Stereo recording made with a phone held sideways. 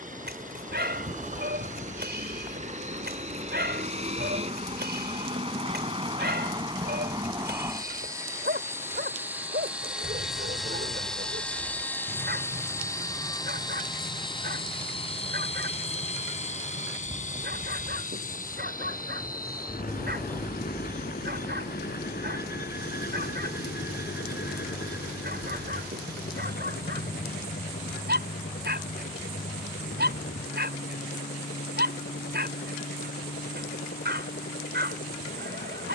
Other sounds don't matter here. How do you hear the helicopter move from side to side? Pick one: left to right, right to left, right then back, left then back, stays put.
right to left.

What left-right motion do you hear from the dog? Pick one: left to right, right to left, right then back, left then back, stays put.
stays put.